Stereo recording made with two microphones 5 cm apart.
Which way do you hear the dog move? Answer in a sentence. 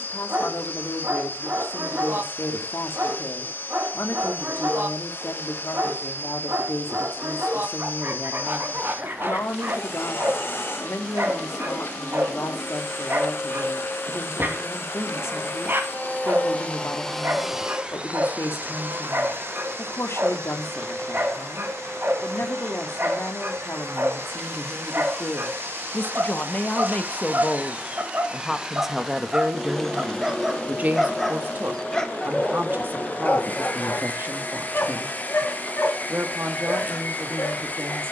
In this clip you hear the dog move to the left.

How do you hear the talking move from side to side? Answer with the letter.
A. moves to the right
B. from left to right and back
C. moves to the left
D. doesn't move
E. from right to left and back
A.